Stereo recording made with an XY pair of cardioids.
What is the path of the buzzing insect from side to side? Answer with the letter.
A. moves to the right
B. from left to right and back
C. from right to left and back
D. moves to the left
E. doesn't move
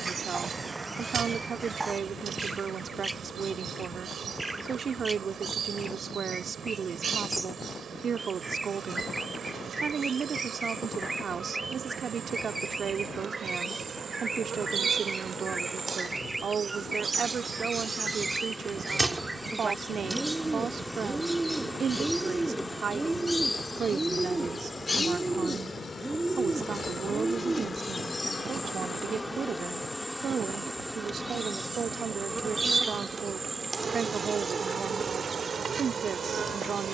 C.